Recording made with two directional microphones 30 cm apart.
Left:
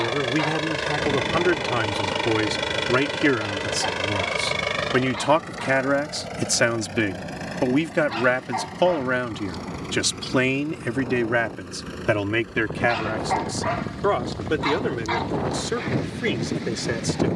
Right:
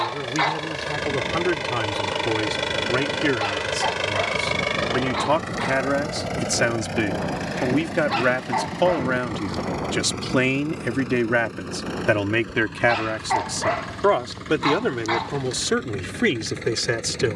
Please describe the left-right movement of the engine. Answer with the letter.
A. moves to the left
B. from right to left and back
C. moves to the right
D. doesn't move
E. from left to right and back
C.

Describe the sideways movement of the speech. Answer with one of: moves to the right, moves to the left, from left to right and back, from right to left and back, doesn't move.
moves to the right.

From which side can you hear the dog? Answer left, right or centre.
right.